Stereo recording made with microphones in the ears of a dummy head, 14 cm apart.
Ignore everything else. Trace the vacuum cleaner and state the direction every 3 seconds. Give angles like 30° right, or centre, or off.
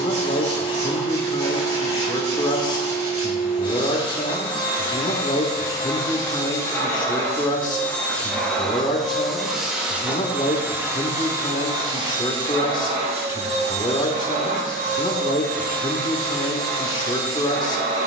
30° left, 30° left, 10° left, 10° right, 40° right, 60° right.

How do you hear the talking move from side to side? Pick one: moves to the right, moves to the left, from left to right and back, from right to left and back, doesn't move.
doesn't move.